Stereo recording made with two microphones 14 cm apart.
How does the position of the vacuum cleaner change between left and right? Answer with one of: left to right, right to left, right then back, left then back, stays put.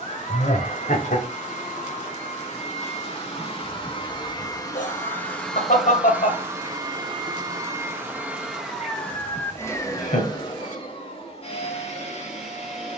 right then back.